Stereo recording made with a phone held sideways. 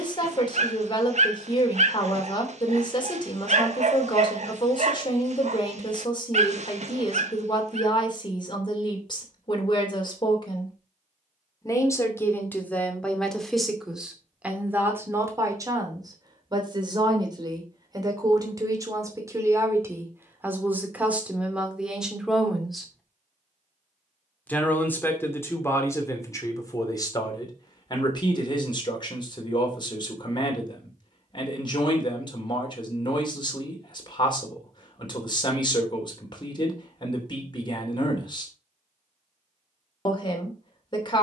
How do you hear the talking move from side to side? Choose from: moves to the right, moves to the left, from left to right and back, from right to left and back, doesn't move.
from left to right and back.